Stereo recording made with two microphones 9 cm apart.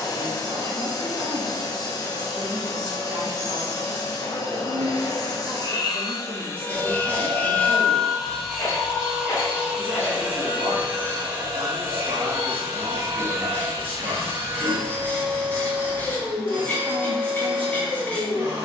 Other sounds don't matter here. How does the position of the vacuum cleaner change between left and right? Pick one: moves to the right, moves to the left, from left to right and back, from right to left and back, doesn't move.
moves to the right.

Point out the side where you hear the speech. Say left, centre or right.
right.